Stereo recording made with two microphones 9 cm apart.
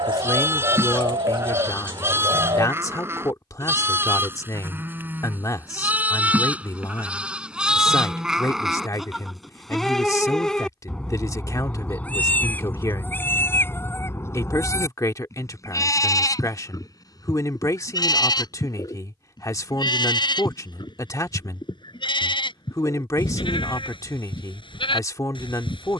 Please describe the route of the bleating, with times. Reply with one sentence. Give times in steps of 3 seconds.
In this clip you hear the bleating on the right from 0 s, in the centre from 6 s and on the left from 12 s.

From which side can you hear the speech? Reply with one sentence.
You can hear the speech on the left.